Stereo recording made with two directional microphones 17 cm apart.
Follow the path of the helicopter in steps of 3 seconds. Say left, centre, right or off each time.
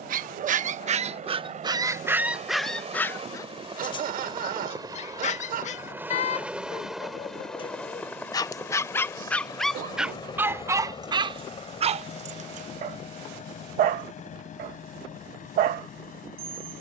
right, right, centre, left, left, left.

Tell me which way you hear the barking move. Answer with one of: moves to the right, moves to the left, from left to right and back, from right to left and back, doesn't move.
from right to left and back.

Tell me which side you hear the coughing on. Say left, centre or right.
right.